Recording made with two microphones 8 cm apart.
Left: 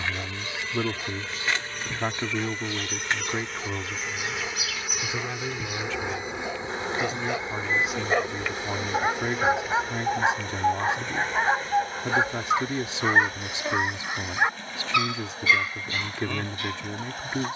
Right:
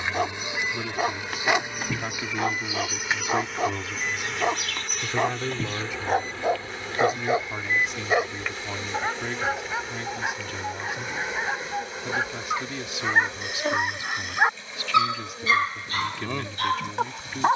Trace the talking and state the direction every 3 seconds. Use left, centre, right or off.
left, centre, centre, left, left, left.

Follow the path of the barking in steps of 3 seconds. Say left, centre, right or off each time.
right, right, right, left, centre, right.